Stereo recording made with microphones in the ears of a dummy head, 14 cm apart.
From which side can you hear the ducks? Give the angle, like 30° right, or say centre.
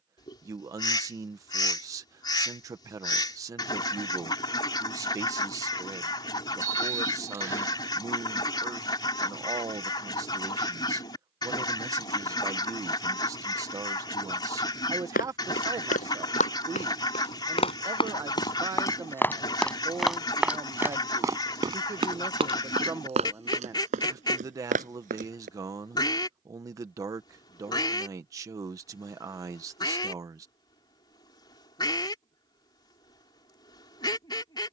30° left.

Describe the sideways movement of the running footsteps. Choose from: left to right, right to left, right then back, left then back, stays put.
left to right.